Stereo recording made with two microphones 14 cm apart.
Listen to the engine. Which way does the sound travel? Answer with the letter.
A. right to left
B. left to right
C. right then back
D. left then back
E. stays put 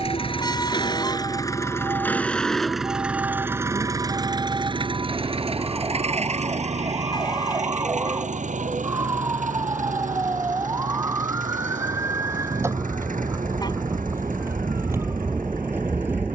B.